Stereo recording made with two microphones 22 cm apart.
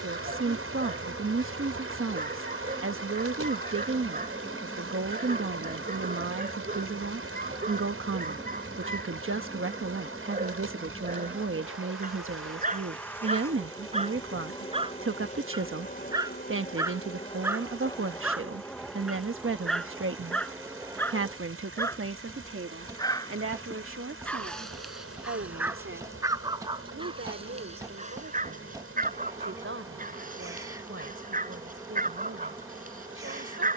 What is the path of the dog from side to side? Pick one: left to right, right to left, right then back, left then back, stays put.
left then back.